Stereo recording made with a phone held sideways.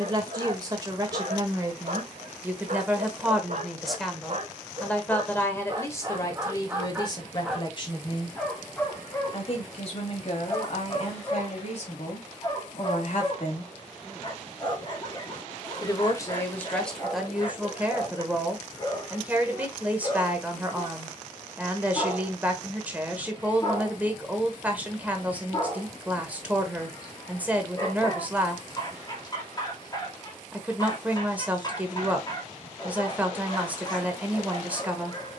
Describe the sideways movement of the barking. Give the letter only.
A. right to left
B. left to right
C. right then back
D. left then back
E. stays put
A.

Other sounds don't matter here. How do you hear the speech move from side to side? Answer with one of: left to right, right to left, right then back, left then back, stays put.
left then back.